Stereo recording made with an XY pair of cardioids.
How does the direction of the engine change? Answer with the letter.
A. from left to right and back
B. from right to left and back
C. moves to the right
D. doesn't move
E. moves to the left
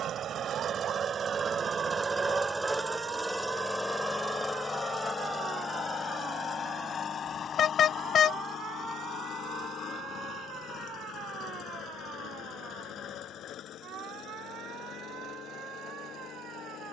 E.